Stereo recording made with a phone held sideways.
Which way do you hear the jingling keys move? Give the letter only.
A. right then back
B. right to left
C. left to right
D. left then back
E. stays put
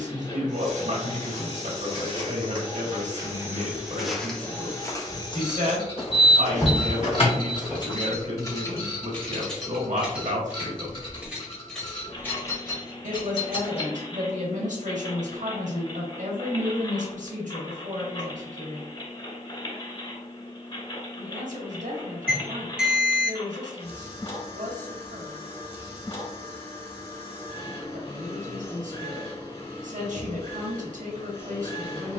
A.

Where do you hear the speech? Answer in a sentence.
In this clip you hear the speech on the right.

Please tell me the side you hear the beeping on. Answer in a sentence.
You can hear the beeping in the centre.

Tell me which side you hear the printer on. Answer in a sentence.
You can hear the printer on the left.